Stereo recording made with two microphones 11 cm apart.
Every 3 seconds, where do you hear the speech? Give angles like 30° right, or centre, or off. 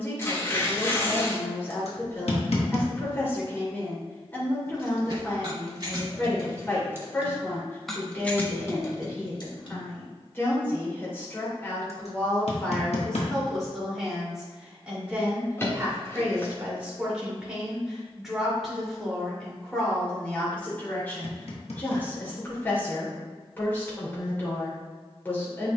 20° left, 20° left, 20° left, 20° left, centre, 10° right, 10° left, 20° left, 20° left.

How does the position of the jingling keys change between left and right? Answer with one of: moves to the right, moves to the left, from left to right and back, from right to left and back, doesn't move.
moves to the left.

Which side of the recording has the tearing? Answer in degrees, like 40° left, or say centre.
20° left.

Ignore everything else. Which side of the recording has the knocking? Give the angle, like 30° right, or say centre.
70° left.